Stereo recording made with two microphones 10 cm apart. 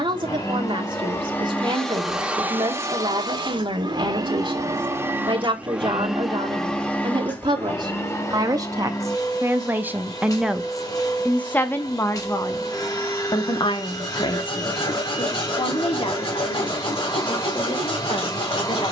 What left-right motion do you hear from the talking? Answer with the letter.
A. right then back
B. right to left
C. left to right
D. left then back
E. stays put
B.